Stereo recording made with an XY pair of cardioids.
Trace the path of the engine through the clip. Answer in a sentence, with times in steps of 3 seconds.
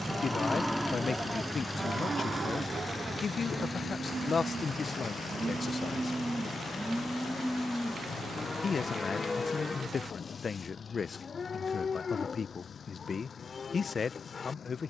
You can hear the engine in the centre from 0 s and on the left from 3 s.